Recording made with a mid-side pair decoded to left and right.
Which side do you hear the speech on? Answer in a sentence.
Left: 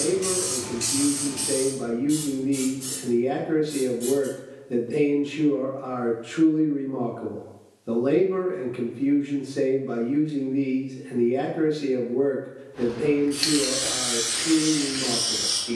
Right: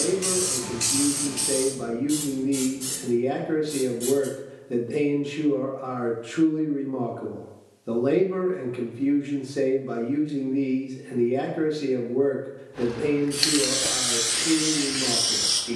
In this clip you hear the speech in the centre.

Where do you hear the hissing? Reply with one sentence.
In this clip you hear the hissing on the right.